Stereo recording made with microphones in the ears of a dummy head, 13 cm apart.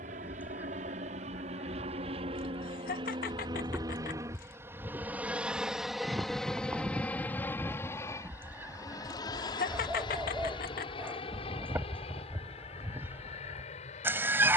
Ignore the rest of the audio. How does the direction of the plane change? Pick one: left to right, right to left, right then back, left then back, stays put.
right to left.